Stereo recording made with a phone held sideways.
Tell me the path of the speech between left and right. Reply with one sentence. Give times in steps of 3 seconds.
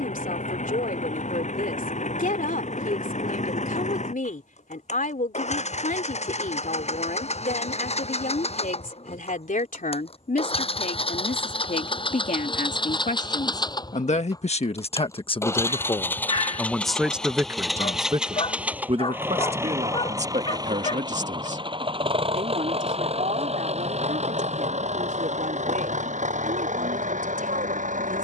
In this clip you hear the speech on the left from 0 s, in the centre from 15 s and on the right from 18 s.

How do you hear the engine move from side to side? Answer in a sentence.
In this clip you hear the engine move to the right.